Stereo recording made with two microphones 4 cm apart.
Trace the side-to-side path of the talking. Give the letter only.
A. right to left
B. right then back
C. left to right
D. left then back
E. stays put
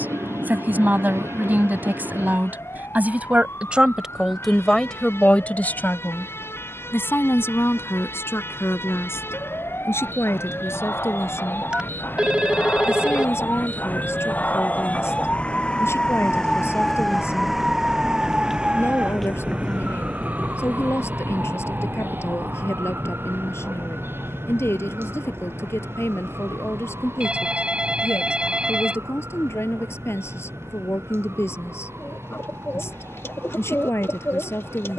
A.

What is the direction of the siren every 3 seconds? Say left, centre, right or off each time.
left, left, left, left, left, centre, right, right, right, right, right, right.